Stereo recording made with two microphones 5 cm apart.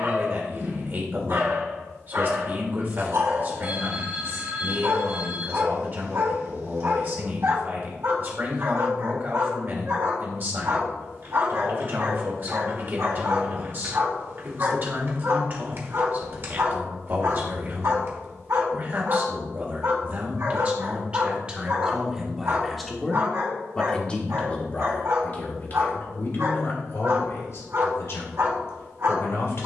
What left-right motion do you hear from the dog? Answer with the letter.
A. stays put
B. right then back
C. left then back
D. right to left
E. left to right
A.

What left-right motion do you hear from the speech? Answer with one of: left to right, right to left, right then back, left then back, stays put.
right to left.